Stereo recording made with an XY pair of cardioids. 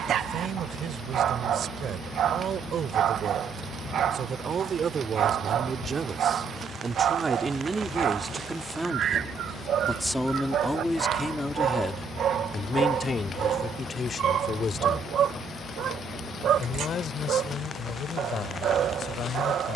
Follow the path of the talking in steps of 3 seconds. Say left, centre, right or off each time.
right, right, right, centre, left, left, left.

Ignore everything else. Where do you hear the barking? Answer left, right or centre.
right.